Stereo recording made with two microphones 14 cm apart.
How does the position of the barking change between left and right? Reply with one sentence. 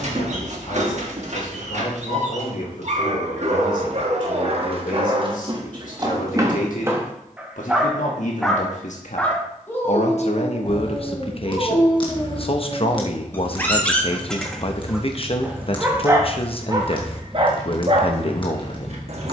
You can hear the barking move from right to left and back again.